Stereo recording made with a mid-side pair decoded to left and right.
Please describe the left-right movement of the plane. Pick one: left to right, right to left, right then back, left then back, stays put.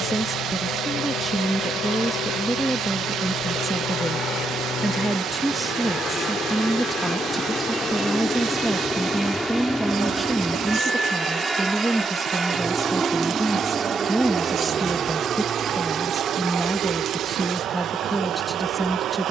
left to right.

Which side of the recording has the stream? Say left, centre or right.
right.